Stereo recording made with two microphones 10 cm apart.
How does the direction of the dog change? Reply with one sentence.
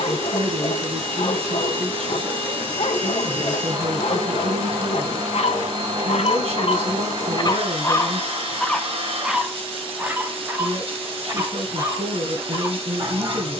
In this clip you hear the dog move to the right.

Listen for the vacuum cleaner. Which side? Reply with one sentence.
In this clip you hear the vacuum cleaner on the right.